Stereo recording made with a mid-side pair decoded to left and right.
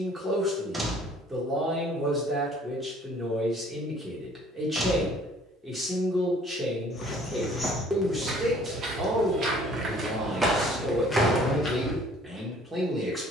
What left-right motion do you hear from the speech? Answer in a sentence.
You can hear the speech stay in one place.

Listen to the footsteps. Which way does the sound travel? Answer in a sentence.
You can hear the footsteps move from left to right and back again.